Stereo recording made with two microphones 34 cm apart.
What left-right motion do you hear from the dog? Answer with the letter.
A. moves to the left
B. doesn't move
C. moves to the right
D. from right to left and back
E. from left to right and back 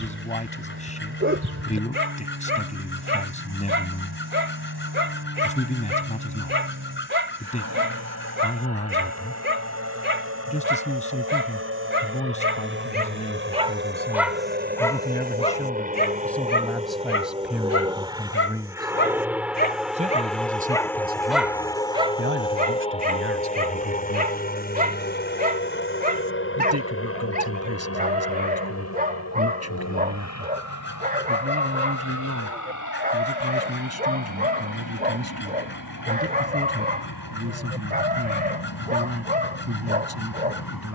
D.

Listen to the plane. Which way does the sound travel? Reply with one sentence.
You can hear the plane move from right to left.